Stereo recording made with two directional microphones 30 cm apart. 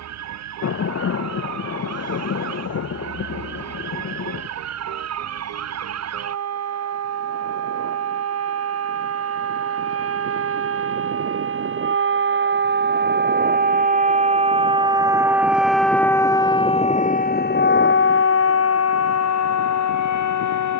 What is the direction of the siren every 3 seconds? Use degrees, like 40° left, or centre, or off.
70° right, 60° right, 60° right, 50° right, 30° right, 10° left, 60° left.